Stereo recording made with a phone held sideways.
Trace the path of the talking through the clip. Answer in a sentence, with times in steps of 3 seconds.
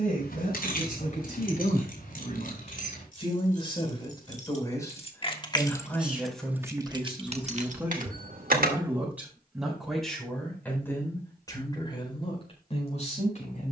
In this clip you hear the talking on the left from 0 s, in the centre from 6 s and on the left from 12 s.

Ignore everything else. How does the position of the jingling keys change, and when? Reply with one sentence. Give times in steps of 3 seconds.
You can hear the jingling keys on the left from 0 s, on the right from 6 s and not at all from 9 s.